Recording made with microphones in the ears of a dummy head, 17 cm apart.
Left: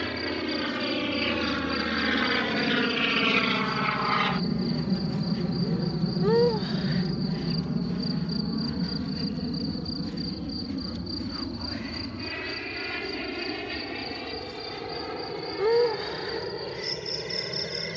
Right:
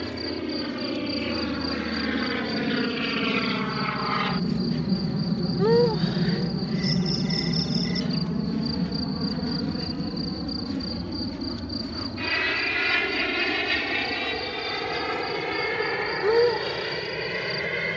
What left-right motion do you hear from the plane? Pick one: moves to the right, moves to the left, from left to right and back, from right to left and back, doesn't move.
moves to the right.